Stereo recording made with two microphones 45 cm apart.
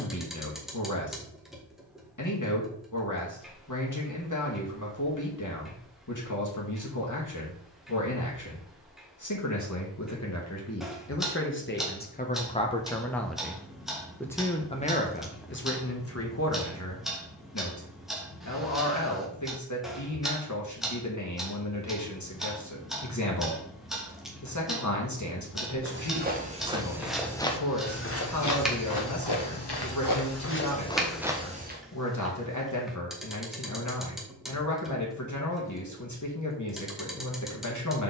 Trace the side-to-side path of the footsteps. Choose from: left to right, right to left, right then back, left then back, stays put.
left then back.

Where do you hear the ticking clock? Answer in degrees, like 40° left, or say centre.
centre.